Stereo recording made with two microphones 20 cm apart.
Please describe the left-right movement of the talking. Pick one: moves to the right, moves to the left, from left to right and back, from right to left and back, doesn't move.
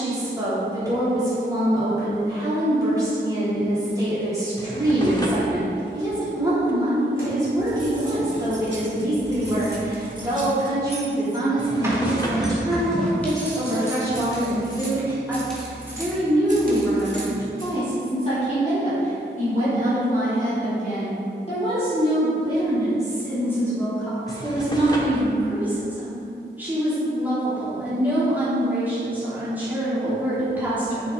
from right to left and back.